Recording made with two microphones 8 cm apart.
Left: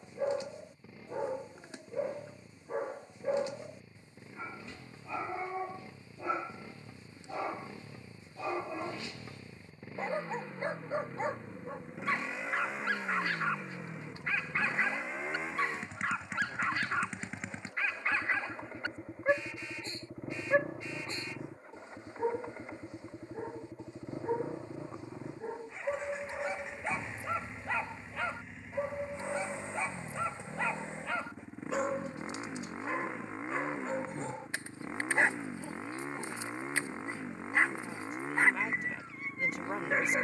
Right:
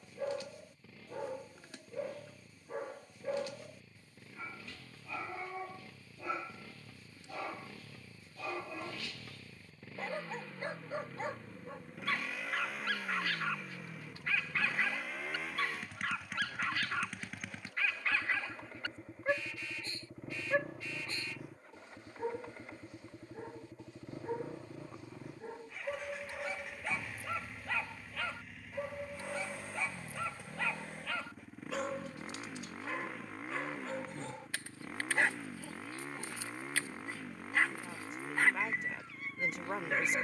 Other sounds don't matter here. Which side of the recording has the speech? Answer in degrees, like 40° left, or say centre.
centre.